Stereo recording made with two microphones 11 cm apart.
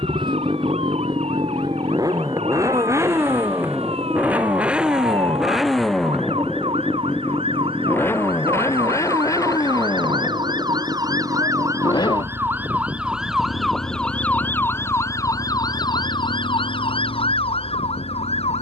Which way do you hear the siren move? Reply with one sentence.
You can hear the siren travel towards the left.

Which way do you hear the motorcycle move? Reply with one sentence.
You can hear the motorcycle move from right to left.